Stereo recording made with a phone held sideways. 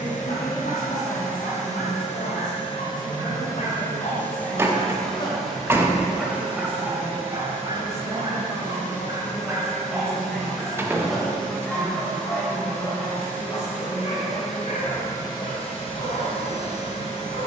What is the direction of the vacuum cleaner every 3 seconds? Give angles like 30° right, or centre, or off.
50° left, 10° left, 20° right, 30° right, 10° right, 40° left.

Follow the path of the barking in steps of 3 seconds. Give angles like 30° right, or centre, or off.
70° left, 60° left, 20° right, 10° right, 30° left, 60° left.